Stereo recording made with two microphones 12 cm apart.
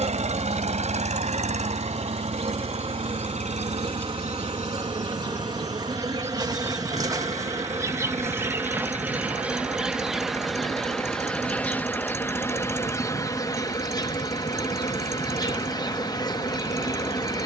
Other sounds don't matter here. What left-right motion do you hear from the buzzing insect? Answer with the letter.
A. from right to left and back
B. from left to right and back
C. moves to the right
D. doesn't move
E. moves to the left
E.